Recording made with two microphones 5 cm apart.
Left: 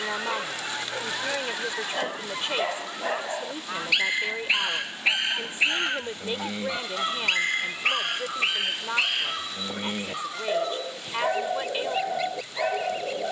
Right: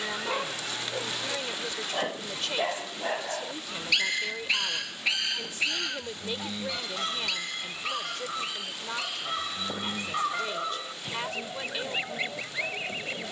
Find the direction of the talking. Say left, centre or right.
left.